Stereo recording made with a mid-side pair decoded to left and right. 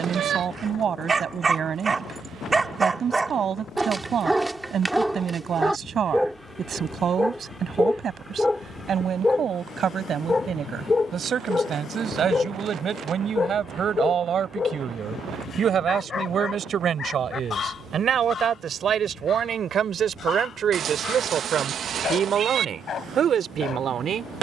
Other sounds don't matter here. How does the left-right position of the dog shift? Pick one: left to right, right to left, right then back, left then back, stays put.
right to left.